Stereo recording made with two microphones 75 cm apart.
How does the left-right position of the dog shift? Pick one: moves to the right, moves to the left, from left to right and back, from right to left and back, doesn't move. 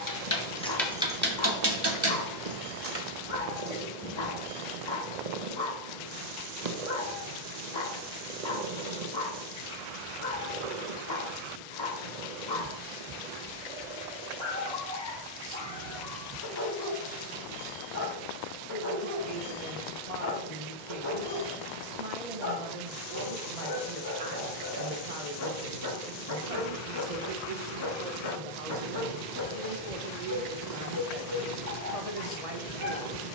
doesn't move.